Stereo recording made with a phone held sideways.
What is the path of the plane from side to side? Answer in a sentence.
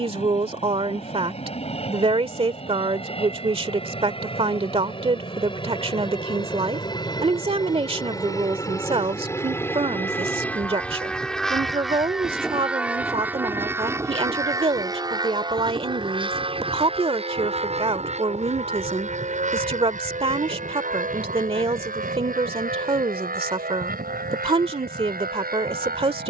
You can hear the plane move from left to right.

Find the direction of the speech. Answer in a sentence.
You can hear the speech on the right.